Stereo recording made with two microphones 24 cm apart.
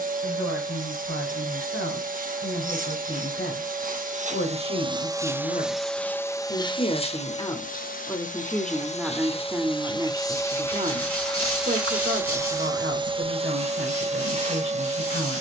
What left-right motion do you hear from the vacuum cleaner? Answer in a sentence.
In this clip you hear the vacuum cleaner go left and come back.